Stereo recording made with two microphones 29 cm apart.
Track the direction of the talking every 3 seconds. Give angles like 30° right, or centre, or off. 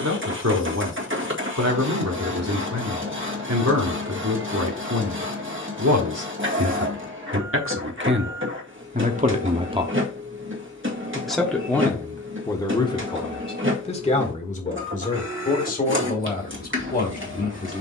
60° right, 60° right, 50° right, 10° right, 20° left, 30° left.